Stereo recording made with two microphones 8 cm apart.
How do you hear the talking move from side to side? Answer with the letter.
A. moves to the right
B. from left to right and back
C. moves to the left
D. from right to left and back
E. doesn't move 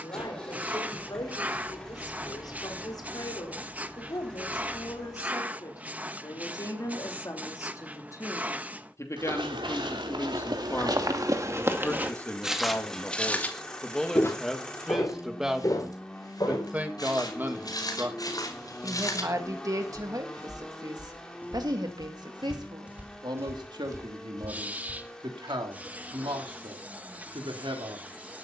A.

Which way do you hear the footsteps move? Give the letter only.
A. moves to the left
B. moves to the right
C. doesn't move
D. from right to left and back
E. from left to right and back
D.